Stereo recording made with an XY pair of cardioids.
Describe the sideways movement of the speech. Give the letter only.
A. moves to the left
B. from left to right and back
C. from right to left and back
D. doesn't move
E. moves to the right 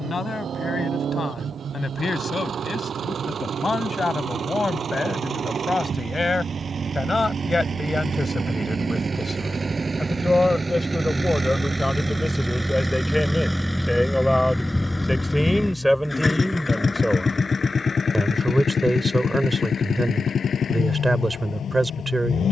E.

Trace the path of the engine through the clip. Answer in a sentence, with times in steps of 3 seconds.
You can hear the engine on the right from 0 s, in the centre from 12 s and on the left from 15 s.